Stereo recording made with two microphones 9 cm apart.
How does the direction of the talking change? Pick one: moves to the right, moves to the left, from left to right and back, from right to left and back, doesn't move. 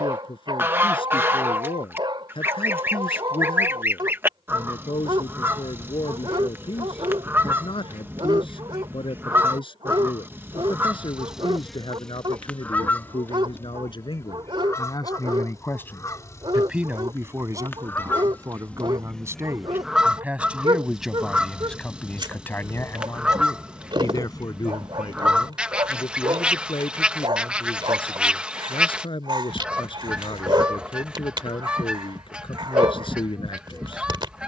from left to right and back.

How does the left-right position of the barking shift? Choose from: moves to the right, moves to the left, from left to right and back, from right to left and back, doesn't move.
doesn't move.